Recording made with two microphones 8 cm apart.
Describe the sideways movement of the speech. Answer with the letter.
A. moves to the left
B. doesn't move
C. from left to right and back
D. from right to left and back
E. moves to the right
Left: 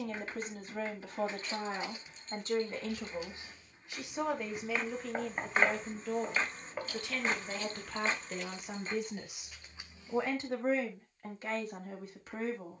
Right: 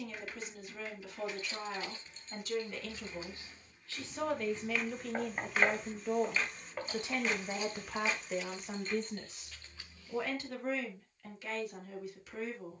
C.